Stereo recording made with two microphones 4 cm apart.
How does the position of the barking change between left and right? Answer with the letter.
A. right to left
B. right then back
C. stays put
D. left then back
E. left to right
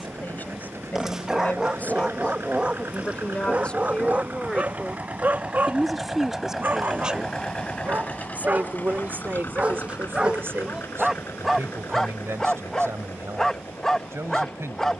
B.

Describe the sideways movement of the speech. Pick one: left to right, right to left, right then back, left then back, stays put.
left to right.